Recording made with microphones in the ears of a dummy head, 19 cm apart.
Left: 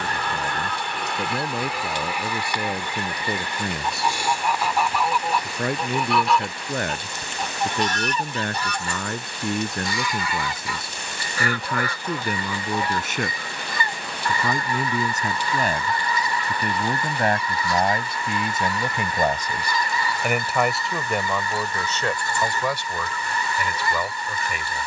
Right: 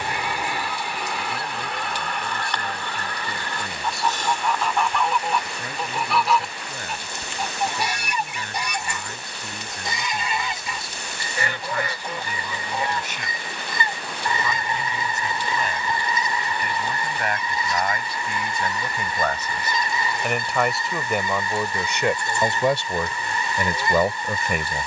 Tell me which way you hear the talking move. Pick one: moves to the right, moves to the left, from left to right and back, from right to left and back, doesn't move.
moves to the right.